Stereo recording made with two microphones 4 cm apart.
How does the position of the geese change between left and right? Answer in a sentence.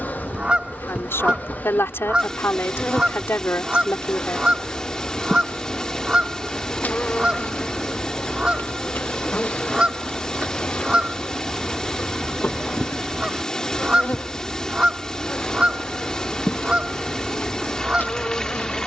In this clip you hear the geese stay put.